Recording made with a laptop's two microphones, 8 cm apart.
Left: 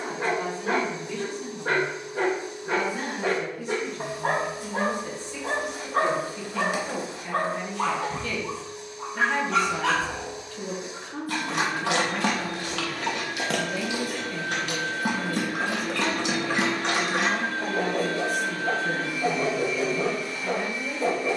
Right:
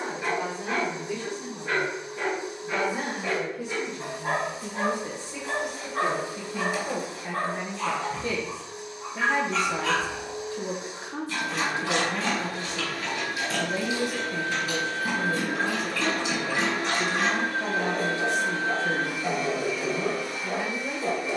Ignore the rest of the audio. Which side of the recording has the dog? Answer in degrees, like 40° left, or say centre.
70° left.